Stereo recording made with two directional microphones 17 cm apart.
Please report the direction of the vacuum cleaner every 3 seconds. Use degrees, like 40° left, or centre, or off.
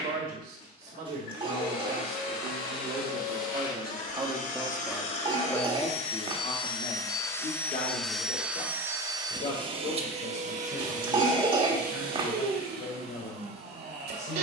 60° left, 50° left, 10° left, 40° right, 70° right.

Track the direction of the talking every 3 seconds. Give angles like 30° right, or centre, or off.
60° right, 20° right, 40° left, 60° left, 70° left.